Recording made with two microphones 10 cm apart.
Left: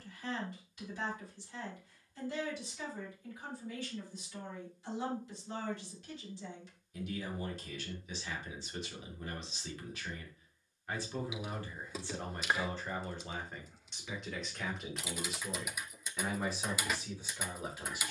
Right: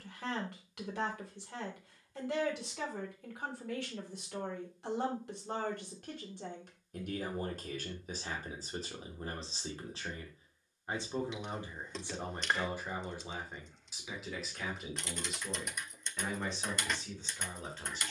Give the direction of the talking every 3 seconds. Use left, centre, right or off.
right, right, right, right, centre, centre.